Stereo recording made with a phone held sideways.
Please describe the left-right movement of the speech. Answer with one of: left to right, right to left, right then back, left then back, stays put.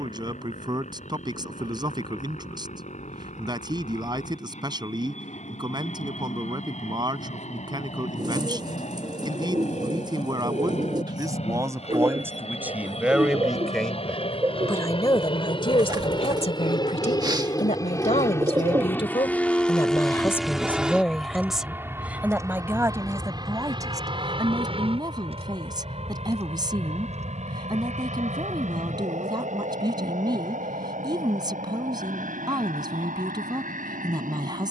left then back.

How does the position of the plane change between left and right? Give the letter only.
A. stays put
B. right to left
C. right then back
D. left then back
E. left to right
E.